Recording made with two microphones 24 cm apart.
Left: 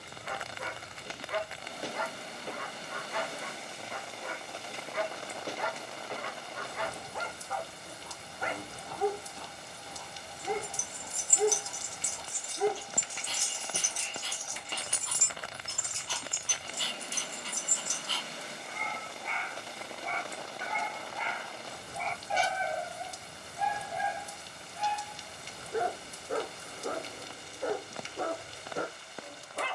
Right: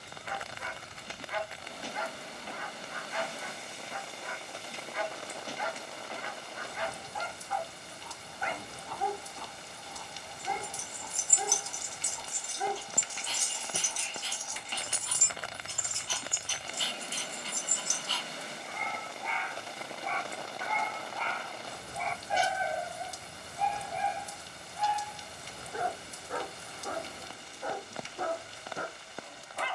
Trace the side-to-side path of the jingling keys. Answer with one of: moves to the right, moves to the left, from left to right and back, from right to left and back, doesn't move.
from left to right and back.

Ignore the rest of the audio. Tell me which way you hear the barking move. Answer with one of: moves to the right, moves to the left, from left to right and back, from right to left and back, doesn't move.
from left to right and back.